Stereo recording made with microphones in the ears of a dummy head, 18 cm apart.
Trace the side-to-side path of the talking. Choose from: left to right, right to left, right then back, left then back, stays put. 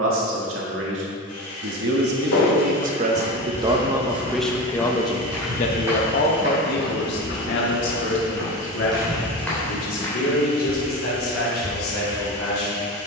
right to left.